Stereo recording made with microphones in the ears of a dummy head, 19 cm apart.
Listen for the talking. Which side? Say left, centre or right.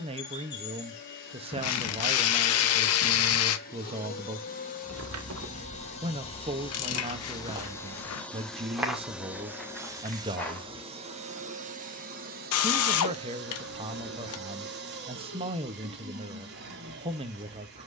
right.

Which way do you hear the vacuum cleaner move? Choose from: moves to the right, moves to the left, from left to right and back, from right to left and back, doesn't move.
moves to the right.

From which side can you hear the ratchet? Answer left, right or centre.
left.